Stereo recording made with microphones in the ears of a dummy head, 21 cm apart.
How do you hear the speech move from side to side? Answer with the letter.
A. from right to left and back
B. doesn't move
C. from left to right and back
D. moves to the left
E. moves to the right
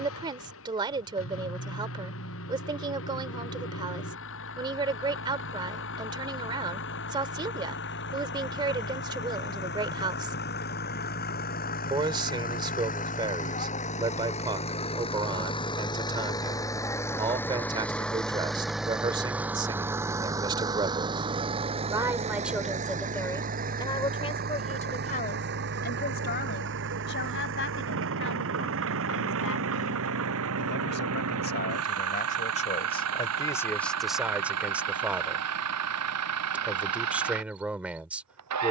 A.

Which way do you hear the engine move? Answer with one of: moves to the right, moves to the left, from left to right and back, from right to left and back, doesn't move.
moves to the right.